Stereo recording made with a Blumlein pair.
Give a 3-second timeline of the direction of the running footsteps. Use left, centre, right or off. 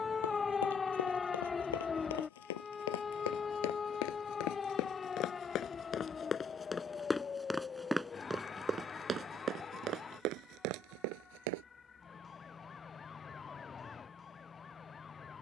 left, left, centre, right, off.